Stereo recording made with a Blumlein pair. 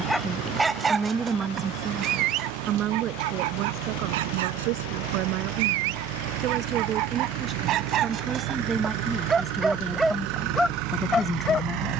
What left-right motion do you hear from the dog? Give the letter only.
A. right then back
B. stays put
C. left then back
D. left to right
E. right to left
A.